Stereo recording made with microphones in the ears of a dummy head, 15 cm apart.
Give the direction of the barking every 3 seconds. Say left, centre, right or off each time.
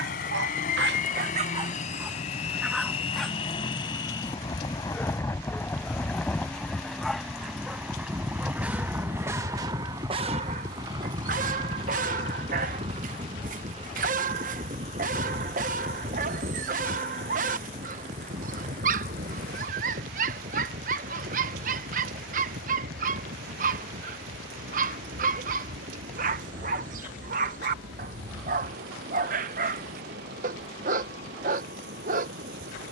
right, centre, centre, right, right, right, right, right, right, right, right.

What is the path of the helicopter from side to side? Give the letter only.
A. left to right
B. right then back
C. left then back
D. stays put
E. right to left
A.